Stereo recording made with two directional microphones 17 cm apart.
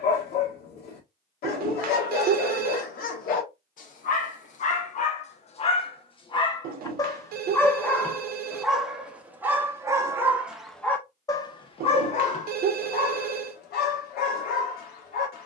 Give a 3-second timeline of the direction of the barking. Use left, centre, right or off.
left, left, centre, centre, left.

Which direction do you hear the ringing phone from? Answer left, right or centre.
right.